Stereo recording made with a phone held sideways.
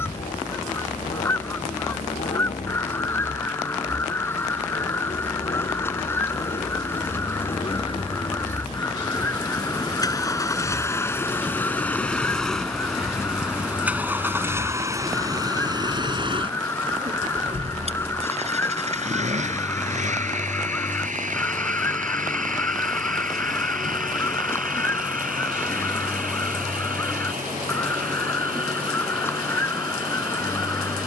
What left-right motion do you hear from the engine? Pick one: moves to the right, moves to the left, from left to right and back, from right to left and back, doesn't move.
moves to the right.